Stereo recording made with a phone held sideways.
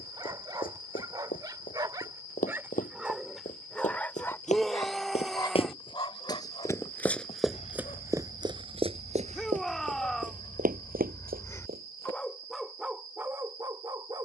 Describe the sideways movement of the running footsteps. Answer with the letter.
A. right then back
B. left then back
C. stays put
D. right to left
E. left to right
E.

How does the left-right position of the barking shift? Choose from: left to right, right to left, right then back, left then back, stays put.
left then back.